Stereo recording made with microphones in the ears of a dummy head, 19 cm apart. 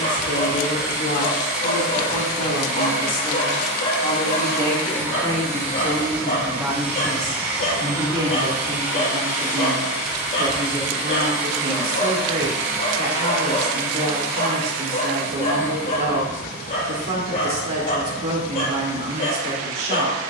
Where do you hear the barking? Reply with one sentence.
In this clip you hear the barking on the left.